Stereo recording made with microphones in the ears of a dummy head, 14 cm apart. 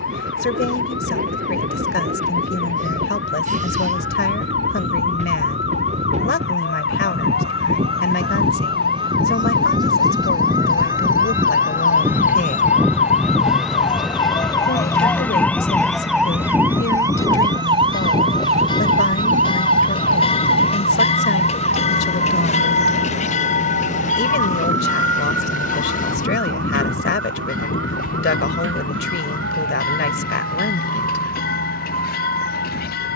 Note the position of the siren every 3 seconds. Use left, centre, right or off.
left, left, left, left, left, centre, right, right, right, right, right.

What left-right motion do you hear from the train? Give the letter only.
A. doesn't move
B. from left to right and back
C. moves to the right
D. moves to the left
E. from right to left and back
D.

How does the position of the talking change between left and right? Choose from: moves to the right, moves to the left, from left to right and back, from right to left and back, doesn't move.
doesn't move.